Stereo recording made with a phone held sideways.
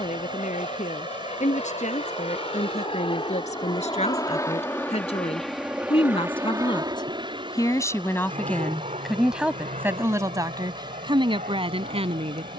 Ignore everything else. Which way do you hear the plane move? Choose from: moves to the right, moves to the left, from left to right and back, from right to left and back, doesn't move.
moves to the right.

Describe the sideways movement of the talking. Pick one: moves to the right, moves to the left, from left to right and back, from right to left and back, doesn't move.
moves to the right.